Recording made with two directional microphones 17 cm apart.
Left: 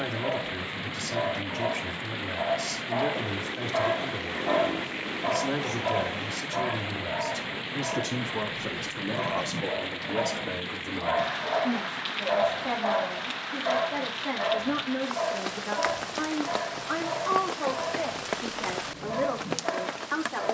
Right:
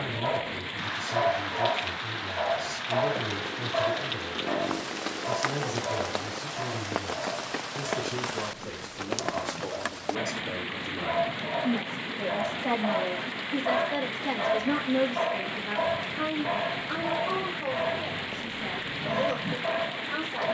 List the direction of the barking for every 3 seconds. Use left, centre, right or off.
right, left, left, left, centre, right, right.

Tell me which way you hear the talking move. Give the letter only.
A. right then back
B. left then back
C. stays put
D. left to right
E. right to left
A.